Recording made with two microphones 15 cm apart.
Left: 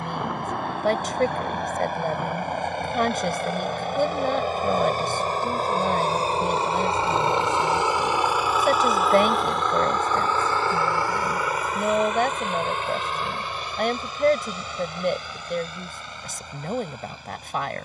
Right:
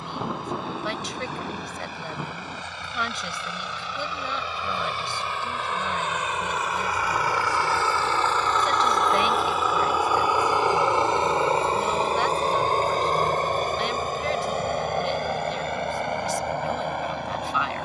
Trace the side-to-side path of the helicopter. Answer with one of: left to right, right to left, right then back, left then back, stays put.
left to right.